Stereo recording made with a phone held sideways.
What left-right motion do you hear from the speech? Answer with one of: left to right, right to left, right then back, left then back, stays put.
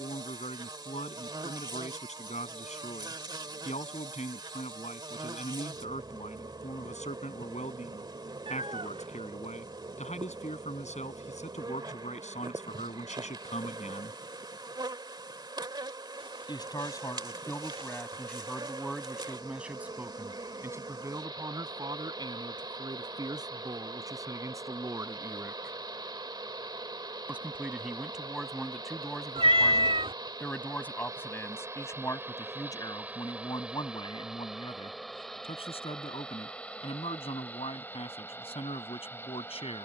right then back.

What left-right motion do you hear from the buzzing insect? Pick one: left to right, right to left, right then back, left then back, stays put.
right to left.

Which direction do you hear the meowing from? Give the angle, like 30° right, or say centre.
40° right.